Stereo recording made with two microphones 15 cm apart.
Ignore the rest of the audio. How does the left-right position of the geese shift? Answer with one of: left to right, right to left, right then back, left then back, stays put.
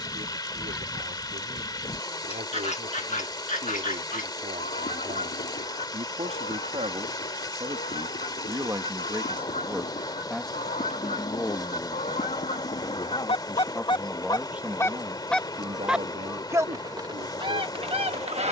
left then back.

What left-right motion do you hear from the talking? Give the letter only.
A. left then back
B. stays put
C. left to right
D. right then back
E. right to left
A.